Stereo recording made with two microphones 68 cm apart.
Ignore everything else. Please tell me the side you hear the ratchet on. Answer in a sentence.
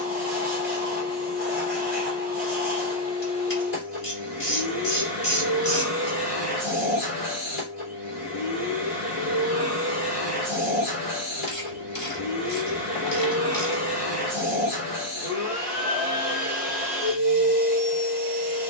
You can hear the ratchet on the left.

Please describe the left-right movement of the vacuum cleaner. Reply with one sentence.
You can hear the vacuum cleaner stay in one place.